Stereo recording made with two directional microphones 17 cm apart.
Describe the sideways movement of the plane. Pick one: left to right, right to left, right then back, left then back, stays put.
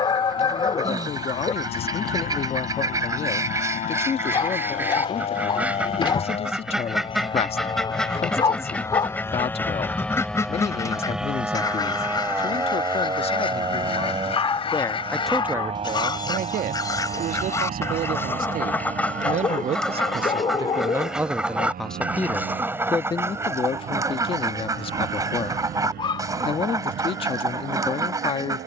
left to right.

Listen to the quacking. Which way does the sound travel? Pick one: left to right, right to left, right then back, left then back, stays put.
left then back.